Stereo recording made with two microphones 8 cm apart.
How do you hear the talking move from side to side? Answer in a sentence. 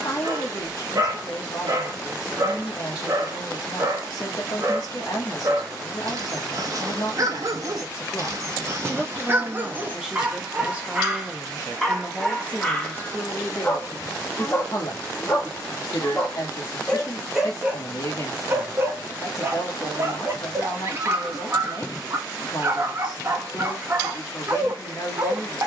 In this clip you hear the talking go right and come back.